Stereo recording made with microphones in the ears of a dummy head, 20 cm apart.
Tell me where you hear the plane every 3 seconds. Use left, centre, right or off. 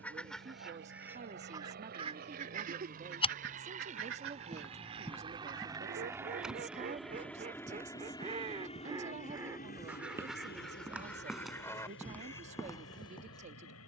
right, right, centre, left, left.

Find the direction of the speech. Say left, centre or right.
right.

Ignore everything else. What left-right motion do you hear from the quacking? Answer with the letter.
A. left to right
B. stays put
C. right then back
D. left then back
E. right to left
C.